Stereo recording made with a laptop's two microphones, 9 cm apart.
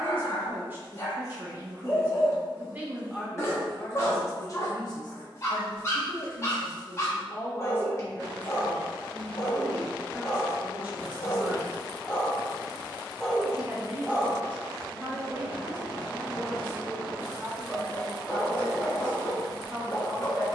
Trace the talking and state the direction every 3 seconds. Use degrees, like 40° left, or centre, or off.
20° right, 30° left, 30° left, 10° right, 20° right, 20° right, 20° right.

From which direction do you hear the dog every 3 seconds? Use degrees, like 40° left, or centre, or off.
30° left, 30° left, 30° left, 30° left, centre, 10° right, 30° left.